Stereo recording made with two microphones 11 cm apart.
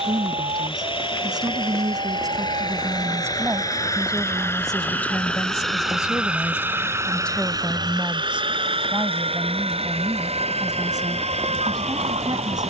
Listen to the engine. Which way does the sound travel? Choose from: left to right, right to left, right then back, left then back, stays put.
left to right.